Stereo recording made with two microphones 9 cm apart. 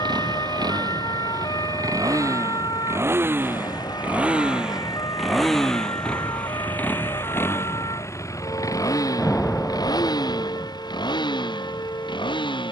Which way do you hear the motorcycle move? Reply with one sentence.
You can hear the motorcycle move from right to left.